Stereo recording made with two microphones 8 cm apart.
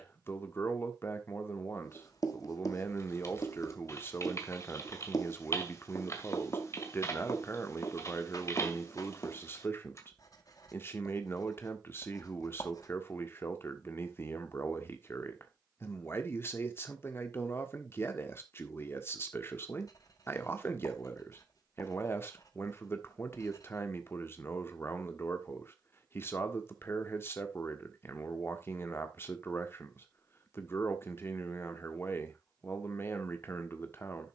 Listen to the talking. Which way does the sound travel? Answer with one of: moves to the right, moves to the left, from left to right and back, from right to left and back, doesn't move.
doesn't move.